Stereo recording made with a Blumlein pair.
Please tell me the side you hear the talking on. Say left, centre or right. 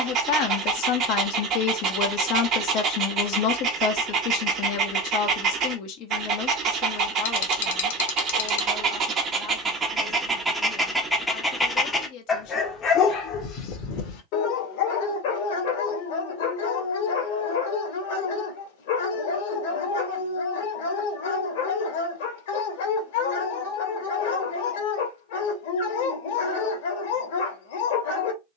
left.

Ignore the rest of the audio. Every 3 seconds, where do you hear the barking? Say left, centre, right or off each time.
right, right, right, centre, left, left, left, left, left, left.